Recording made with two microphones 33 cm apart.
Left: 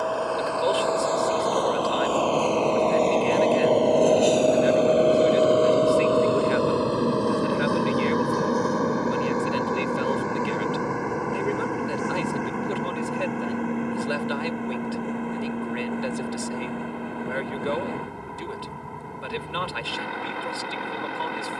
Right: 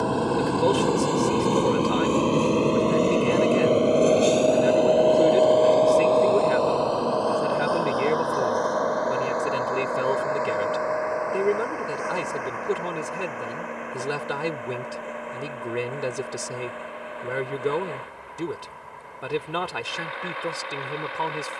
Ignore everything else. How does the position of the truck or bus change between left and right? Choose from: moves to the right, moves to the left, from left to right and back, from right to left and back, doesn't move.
moves to the left.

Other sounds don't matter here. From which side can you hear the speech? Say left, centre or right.
right.